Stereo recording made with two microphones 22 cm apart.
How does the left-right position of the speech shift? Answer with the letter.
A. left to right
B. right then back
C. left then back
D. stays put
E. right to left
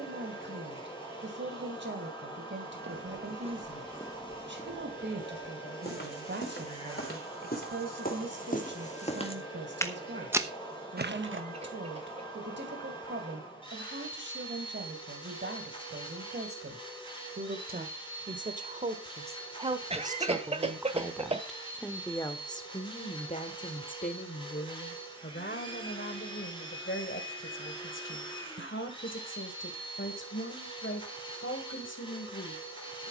E.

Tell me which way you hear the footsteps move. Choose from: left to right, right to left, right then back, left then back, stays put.
left then back.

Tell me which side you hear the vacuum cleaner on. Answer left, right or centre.
left.